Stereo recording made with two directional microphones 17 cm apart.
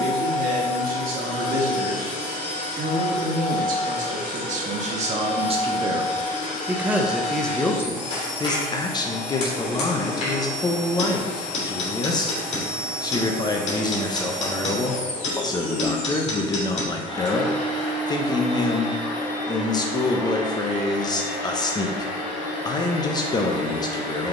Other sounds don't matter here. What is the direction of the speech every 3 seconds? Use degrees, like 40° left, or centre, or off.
60° right, 40° right, 10° left, 20° left, 20° left, 20° left, 20° left, 20° left.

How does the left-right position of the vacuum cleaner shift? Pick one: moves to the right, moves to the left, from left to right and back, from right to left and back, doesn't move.
doesn't move.